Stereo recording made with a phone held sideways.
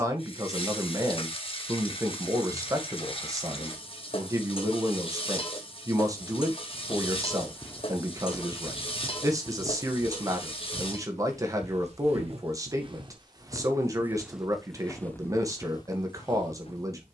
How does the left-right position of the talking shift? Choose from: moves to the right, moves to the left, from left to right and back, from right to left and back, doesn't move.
doesn't move.